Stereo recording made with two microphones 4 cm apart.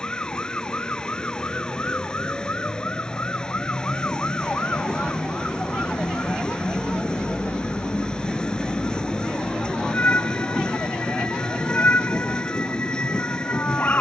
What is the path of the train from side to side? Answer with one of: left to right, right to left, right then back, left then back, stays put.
stays put.